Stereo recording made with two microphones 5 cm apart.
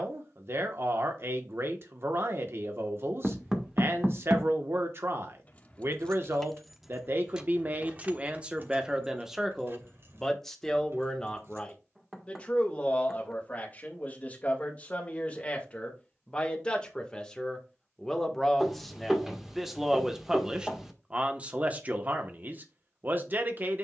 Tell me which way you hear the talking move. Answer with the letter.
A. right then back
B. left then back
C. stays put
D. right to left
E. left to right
B.